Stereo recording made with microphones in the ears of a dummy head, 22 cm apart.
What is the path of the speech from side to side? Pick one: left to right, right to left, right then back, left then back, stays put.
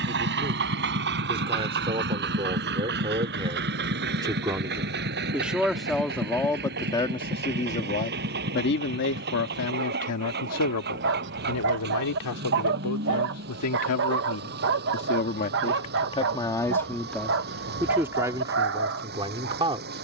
left then back.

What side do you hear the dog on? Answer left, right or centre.
right.